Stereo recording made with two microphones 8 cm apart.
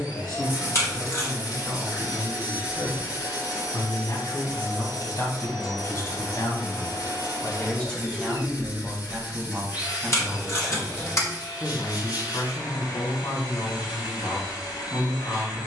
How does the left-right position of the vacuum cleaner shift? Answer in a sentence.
You can hear the vacuum cleaner stay in one place.